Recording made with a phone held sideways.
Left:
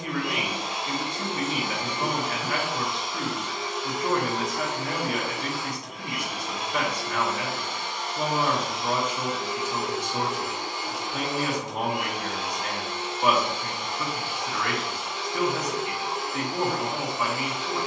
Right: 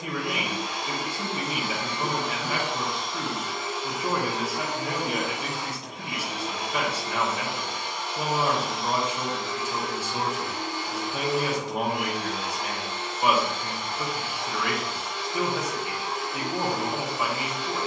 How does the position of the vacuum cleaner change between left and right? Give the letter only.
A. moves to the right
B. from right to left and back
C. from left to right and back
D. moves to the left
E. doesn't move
C.